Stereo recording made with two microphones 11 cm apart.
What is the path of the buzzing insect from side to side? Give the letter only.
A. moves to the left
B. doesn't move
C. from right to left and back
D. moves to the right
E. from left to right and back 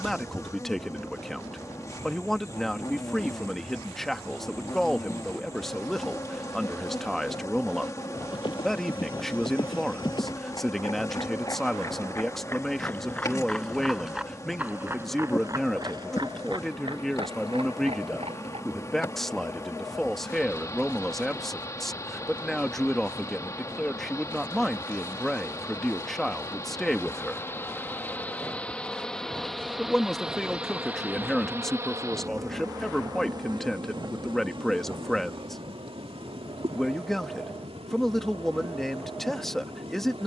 D.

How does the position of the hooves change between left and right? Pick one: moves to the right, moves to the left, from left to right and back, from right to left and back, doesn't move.
moves to the right.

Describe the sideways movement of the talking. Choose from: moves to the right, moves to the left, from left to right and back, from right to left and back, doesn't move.
doesn't move.